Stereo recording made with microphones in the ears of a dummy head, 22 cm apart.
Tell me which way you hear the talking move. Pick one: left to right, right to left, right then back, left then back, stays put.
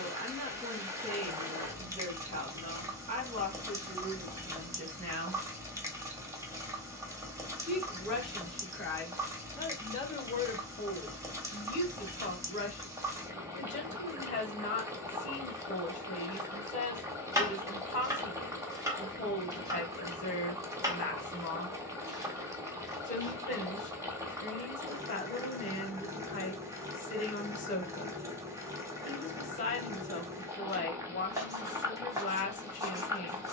right to left.